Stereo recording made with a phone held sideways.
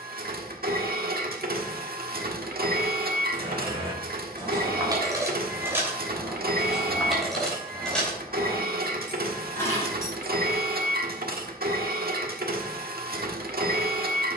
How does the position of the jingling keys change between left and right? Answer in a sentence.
You can hear the jingling keys move to the left.